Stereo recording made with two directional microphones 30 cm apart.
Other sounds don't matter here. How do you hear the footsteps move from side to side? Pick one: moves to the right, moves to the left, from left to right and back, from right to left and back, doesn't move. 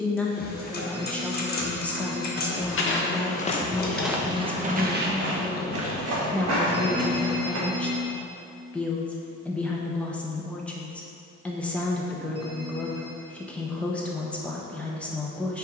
moves to the right.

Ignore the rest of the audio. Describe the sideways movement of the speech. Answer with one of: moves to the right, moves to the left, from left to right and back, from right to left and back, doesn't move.
doesn't move.